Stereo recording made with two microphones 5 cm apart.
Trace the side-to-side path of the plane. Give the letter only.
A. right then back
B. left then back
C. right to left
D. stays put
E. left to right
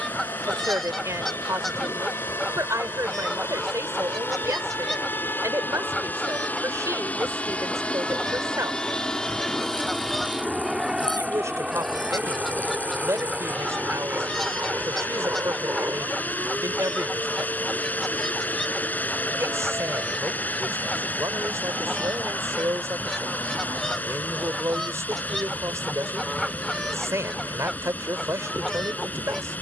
E.